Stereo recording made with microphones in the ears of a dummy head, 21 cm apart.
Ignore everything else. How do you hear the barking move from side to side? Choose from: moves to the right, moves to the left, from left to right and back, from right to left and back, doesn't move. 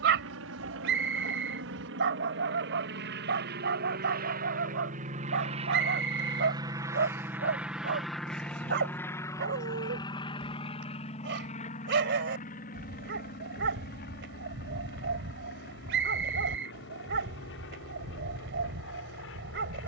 doesn't move.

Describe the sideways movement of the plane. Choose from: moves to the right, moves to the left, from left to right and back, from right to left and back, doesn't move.
moves to the left.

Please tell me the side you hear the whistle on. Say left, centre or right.
right.